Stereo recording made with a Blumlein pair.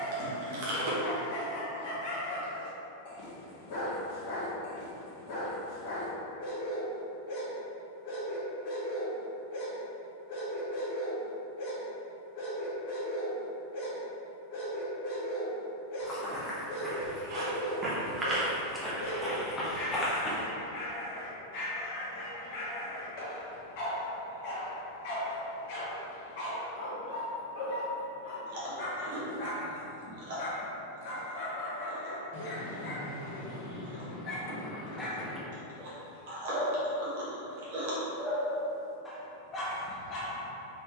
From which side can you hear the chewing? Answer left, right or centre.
right.